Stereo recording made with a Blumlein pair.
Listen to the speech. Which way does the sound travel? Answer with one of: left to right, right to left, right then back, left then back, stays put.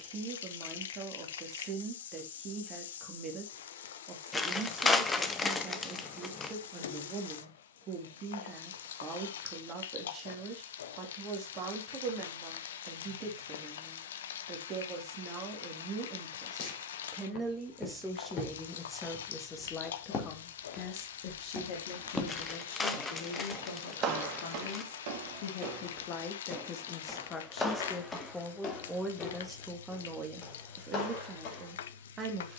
left then back.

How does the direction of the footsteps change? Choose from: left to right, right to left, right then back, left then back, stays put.
right then back.